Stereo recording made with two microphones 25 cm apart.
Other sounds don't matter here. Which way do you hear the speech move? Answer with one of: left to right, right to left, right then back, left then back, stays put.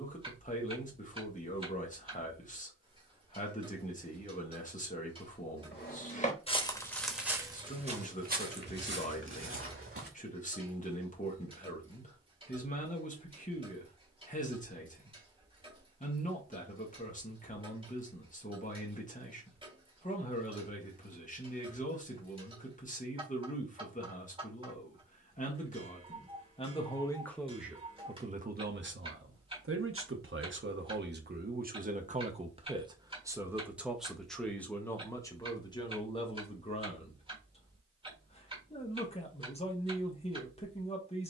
right then back.